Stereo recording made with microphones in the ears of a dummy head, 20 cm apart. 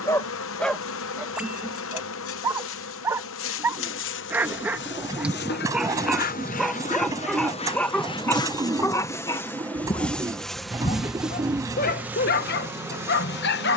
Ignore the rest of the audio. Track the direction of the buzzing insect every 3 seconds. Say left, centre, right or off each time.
left, left, left, centre, centre.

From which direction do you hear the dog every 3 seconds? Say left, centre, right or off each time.
centre, centre, centre, left, left.